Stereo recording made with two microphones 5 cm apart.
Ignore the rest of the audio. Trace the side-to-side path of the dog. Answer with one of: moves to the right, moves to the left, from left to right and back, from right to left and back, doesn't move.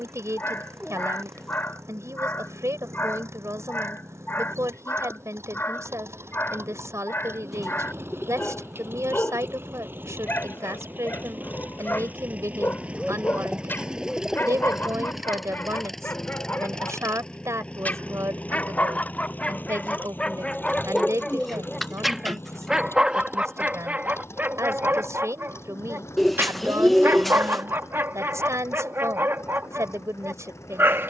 moves to the right.